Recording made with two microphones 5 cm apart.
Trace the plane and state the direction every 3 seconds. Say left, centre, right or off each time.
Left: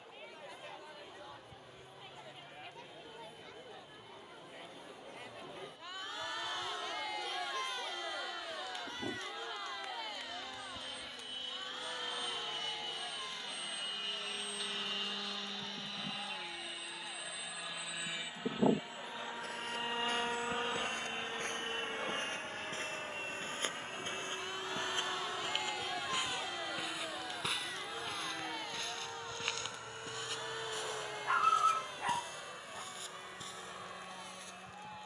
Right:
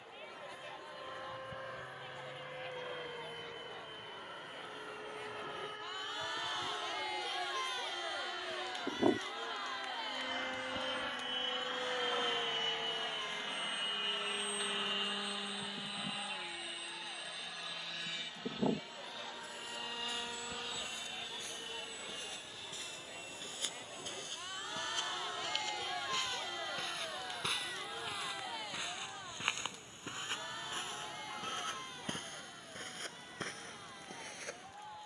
right, right, right, right, right, centre, left, left, left, left, left, left.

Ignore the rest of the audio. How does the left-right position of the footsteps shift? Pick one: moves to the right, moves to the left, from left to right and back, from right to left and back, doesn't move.
moves to the right.